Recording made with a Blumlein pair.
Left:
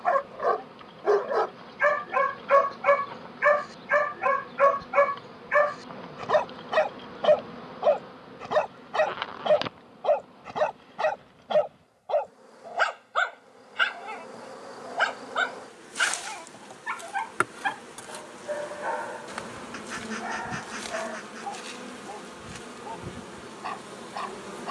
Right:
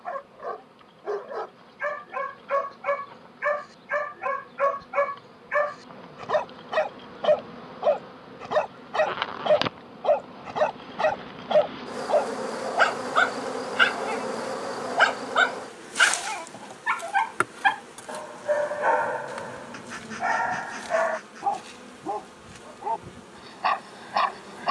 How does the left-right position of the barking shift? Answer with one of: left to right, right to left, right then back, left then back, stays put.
left to right.